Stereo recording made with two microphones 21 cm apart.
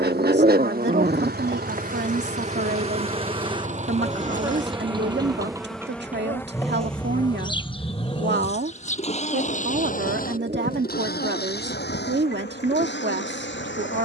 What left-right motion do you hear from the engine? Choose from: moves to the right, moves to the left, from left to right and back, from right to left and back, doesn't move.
moves to the left.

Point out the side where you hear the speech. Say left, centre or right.
right.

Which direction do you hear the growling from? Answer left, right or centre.
right.